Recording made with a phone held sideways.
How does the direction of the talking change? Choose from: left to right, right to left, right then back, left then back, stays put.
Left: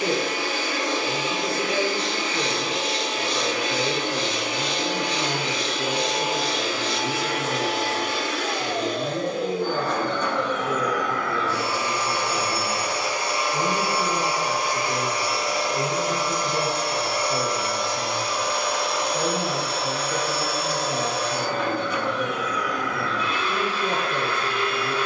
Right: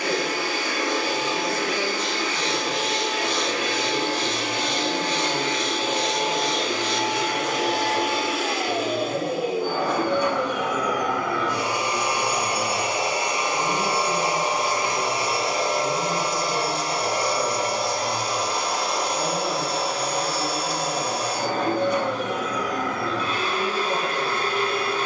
stays put.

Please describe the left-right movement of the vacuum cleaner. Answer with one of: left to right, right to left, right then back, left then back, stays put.
left to right.